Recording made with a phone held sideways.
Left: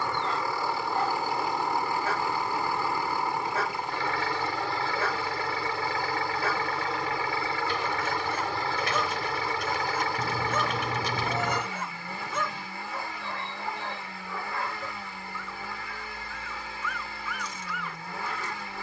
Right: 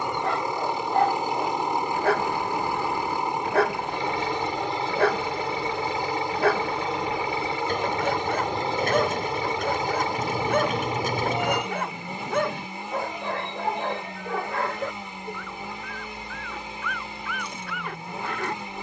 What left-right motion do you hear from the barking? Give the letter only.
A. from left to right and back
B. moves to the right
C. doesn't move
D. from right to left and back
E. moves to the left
C.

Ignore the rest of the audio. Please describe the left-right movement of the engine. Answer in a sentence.
In this clip you hear the engine stay put.